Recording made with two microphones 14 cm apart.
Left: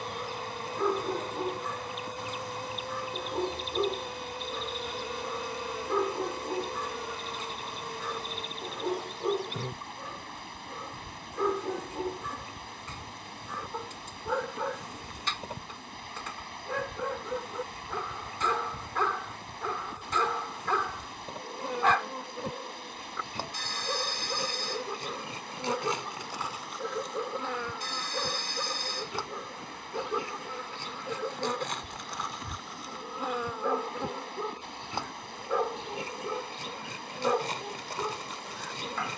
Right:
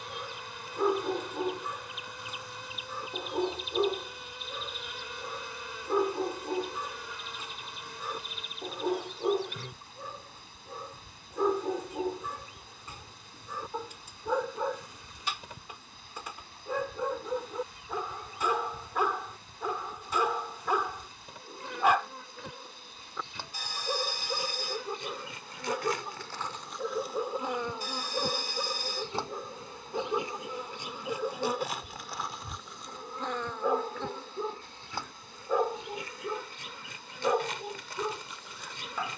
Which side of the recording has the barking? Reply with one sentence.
In this clip you hear the barking in the centre.